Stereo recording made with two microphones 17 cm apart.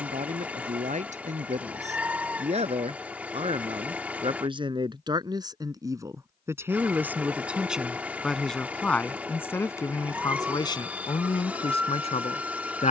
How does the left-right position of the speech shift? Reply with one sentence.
In this clip you hear the speech go from the right side to the left.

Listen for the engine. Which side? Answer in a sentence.
You can hear the engine in the centre.